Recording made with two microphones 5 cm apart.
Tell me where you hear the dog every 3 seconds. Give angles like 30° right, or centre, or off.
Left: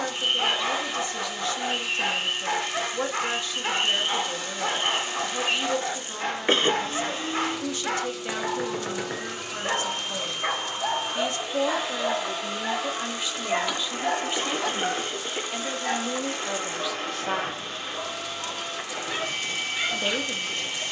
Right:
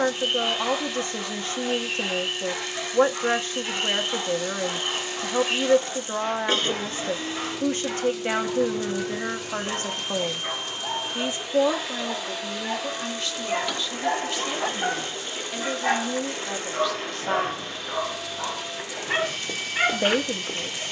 60° left, 60° left, 60° left, 50° left, 10° left, 40° right, 50° right.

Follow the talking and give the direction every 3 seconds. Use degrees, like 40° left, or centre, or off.
40° right, 40° right, 40° right, 30° right, 10° left, 10° left, 30° right.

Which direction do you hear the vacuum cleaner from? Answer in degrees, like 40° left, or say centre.
40° left.